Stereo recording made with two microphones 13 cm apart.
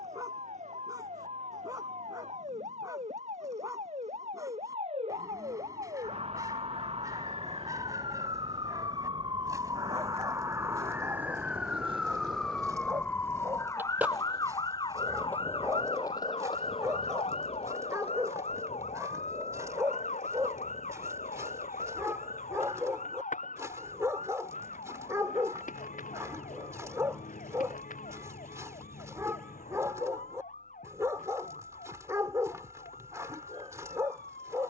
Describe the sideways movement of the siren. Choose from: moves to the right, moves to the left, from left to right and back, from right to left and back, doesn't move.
moves to the left.